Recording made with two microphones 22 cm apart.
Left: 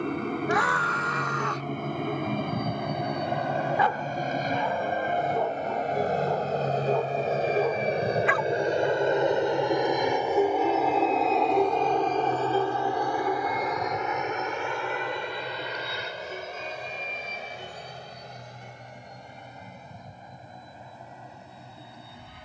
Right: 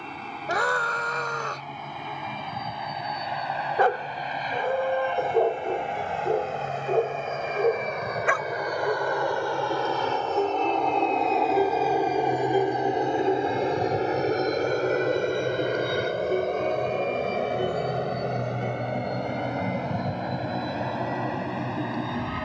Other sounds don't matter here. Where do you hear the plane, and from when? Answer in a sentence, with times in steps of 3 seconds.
You can hear the plane on the left from 0 s, in the centre from 9 s and on the right from 12 s.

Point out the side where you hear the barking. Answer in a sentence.
You can hear the barking on the right.